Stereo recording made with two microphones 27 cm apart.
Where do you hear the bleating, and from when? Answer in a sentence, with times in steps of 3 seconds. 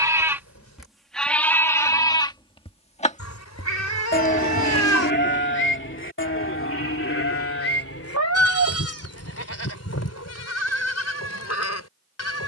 You can hear the bleating in the centre from 0 s and on the left from 3 s.